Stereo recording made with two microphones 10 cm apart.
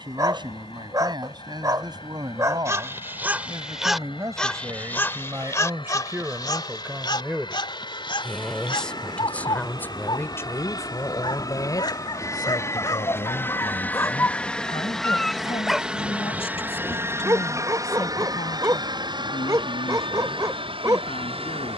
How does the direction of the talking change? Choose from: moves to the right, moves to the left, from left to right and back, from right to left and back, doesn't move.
moves to the left.